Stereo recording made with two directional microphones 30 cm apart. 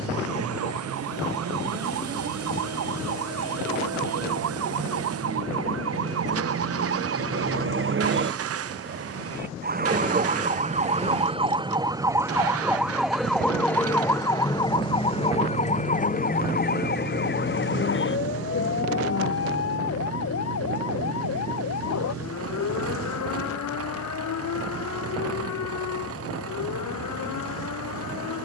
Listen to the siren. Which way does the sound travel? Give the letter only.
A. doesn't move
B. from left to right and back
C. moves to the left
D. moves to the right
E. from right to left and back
C.